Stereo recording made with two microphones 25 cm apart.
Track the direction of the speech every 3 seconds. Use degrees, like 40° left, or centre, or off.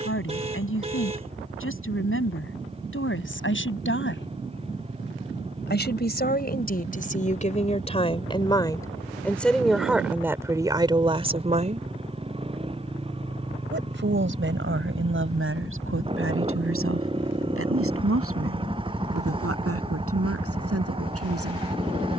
60° left, 50° left, 30° left, 10° right, 50° right, 60° right, 70° right, 80° right.